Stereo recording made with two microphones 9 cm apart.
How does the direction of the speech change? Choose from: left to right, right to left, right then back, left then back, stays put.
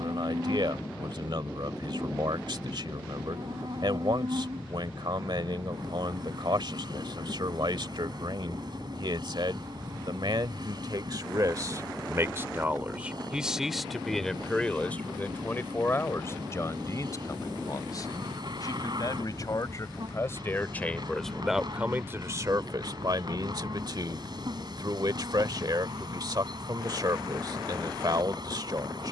left then back.